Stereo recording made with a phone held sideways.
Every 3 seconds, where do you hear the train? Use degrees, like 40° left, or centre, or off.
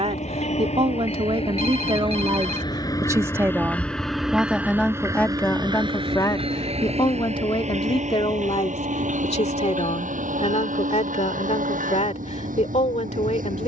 50° left, 10° right, 50° right, 70° right, 80° right.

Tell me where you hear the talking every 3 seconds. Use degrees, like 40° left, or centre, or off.
40° right, centre, 40° left, 60° left, 60° left.